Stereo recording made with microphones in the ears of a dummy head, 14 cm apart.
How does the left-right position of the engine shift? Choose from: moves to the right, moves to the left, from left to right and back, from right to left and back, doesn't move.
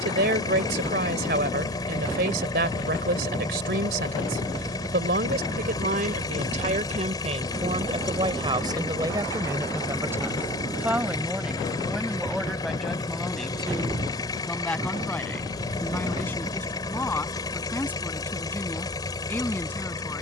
doesn't move.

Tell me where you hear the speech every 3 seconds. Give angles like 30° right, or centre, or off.
70° right, 70° right, 40° right, 10° right, centre, 10° left, 10° left.